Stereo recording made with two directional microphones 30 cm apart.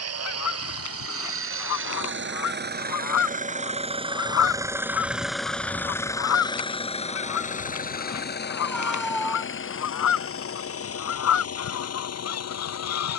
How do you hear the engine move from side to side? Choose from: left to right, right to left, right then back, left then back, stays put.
right to left.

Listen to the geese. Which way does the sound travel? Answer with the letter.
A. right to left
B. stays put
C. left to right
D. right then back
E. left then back
B.